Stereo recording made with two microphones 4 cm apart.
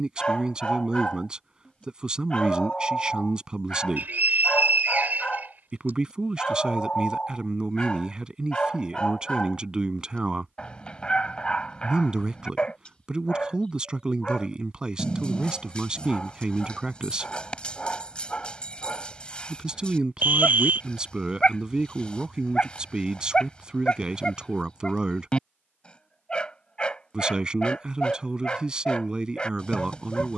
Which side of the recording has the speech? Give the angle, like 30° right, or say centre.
20° right.